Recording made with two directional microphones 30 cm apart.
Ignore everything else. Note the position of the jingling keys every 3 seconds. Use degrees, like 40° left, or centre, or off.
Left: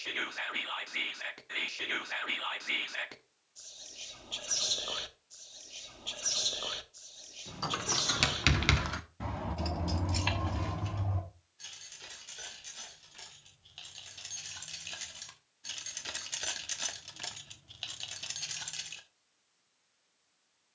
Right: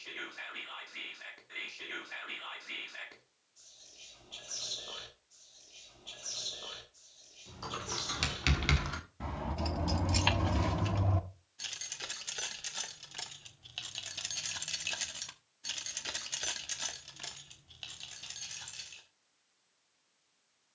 off, off, 30° left, 30° right, 60° right, centre, 40° left.